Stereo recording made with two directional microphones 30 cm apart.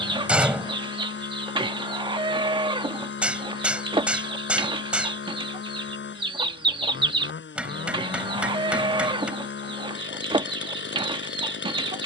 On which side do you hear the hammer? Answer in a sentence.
You can hear the hammer in the centre.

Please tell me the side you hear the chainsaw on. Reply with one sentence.
You can hear the chainsaw on the left.